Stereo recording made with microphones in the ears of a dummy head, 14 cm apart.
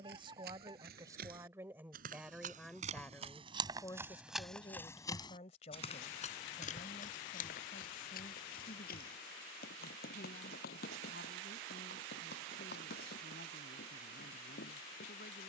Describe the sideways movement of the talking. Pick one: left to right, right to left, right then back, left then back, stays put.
right to left.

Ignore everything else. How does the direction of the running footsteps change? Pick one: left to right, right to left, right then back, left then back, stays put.
right to left.